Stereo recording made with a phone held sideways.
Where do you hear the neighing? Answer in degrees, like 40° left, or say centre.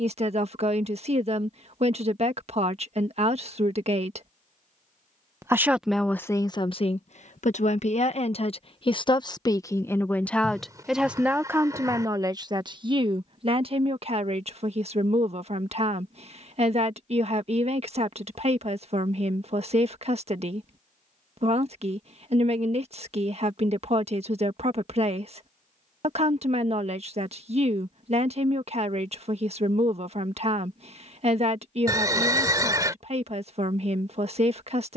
20° right.